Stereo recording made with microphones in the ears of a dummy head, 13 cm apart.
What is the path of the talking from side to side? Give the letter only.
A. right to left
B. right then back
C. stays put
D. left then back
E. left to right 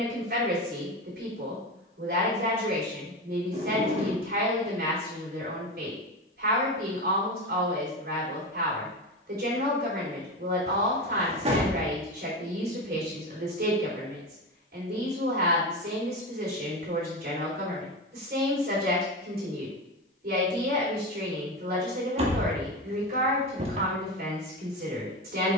C.